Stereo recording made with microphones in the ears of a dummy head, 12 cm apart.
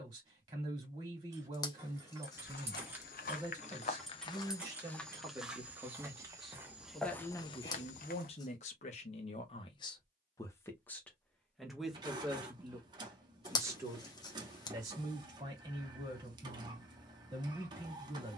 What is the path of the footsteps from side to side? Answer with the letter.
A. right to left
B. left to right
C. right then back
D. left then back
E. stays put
C.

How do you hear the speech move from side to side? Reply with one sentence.
In this clip you hear the speech move from right to left and back again.